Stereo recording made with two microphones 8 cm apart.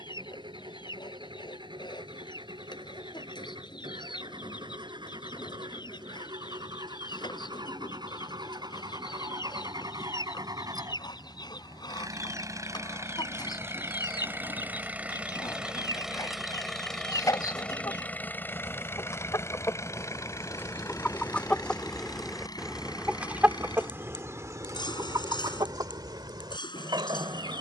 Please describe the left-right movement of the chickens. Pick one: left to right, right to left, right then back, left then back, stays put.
left to right.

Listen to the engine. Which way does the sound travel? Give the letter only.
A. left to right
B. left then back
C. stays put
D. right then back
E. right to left
E.